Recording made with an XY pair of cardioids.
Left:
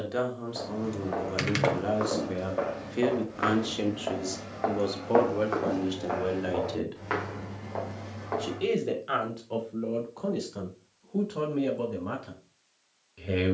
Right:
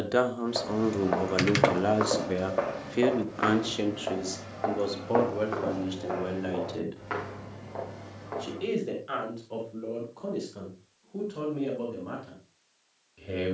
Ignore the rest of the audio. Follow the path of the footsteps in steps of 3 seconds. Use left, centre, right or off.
right, centre, left, off, off.